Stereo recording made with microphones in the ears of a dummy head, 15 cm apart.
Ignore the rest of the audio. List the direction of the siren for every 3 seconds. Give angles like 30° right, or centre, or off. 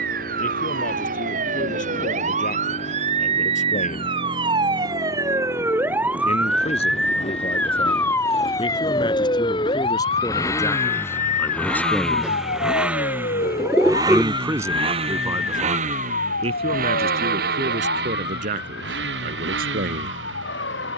50° right, 30° right, 10° left, 40° left, 50° left, 60° left, 70° left.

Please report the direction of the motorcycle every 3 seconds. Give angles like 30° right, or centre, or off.
50° left, 50° left, 40° left, 20° left, 20° right, 50° right, 70° right.